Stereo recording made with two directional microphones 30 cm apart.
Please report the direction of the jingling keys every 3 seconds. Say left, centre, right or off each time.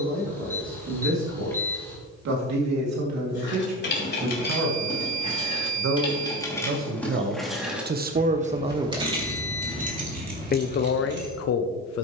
off, left, centre, right.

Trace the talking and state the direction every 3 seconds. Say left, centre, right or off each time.
right, right, right, left.